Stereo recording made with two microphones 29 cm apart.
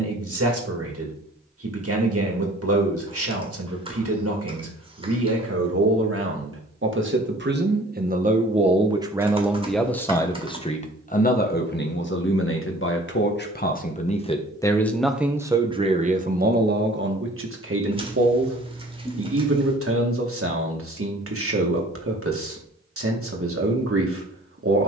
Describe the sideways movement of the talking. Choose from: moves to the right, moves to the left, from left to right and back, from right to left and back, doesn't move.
from right to left and back.